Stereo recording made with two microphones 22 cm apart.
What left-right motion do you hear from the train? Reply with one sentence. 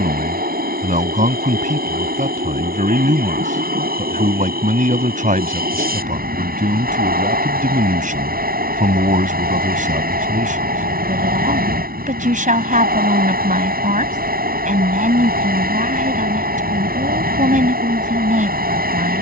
You can hear the train stay in one place.